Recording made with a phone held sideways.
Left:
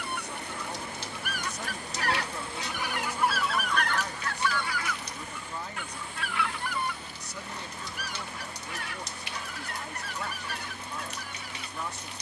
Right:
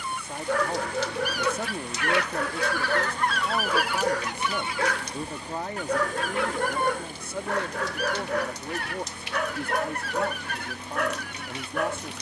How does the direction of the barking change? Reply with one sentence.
In this clip you hear the barking stay in one place.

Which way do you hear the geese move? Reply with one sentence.
You can hear the geese travel towards the right.